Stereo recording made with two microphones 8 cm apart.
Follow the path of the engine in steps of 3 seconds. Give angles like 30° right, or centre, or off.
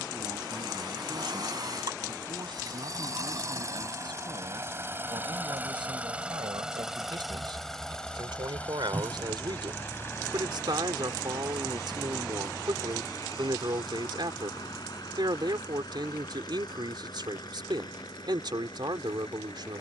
50° right, 30° right, centre, 30° left, 50° left, 60° left, 60° left.